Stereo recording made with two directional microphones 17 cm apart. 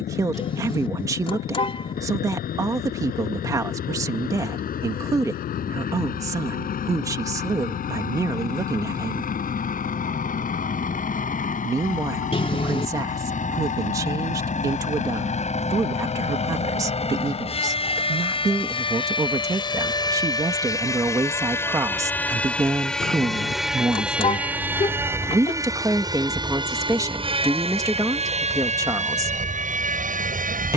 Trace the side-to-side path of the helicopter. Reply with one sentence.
You can hear the helicopter travel towards the right.